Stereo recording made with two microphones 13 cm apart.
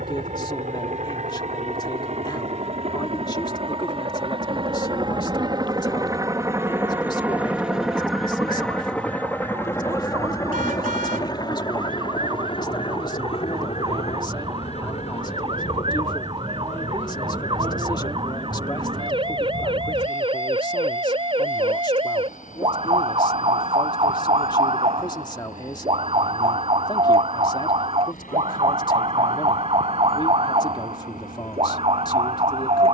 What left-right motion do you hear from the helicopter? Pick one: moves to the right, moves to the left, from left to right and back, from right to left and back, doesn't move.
moves to the left.